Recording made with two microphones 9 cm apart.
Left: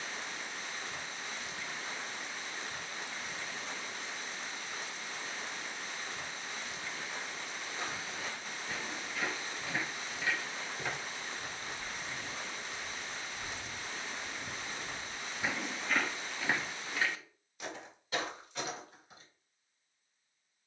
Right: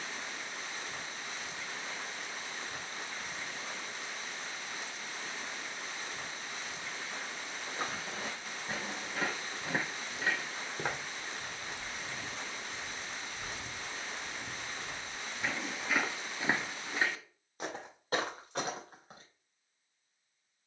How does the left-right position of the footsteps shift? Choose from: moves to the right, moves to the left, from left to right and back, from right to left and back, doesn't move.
from right to left and back.